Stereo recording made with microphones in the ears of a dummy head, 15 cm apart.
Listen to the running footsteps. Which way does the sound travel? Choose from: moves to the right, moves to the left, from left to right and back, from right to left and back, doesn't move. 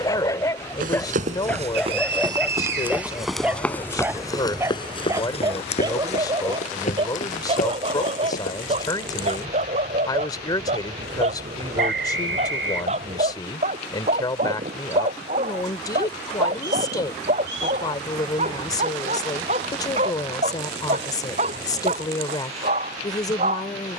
moves to the left.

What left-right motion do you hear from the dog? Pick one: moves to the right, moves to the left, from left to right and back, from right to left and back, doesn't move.
moves to the right.